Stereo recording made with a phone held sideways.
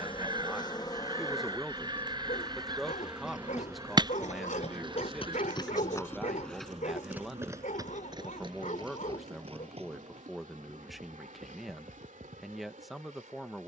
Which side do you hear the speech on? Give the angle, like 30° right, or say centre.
centre.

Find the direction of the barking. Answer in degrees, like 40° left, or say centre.
70° left.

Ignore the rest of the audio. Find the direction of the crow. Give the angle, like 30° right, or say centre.
30° right.